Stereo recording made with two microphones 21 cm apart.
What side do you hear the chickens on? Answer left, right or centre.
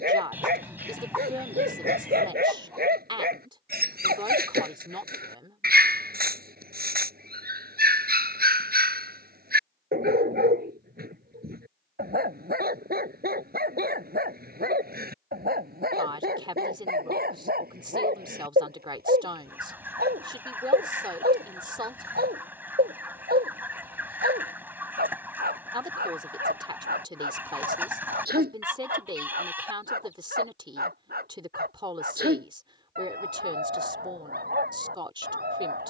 centre.